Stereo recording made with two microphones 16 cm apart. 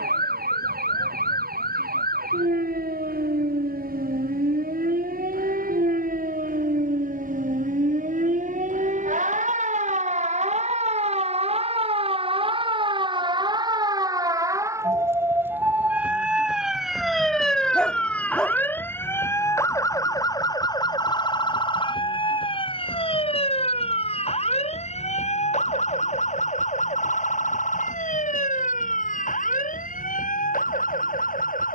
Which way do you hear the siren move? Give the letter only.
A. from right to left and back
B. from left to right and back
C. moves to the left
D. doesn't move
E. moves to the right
C.